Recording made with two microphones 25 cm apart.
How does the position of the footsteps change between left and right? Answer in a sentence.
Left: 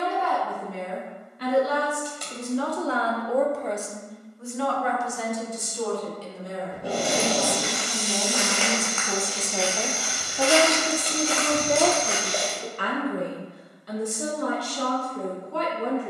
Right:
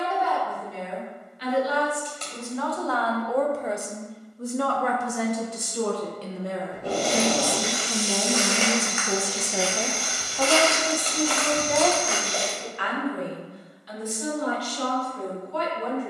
You can hear the footsteps go from the right side to the left.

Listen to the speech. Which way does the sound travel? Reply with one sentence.
In this clip you hear the speech move from left to right and back again.